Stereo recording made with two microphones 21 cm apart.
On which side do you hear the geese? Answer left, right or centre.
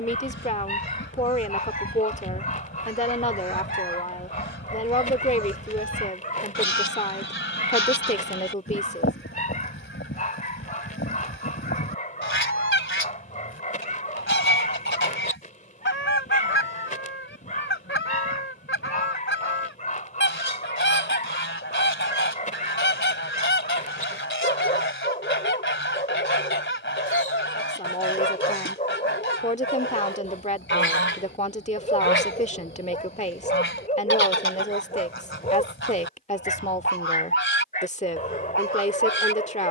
left.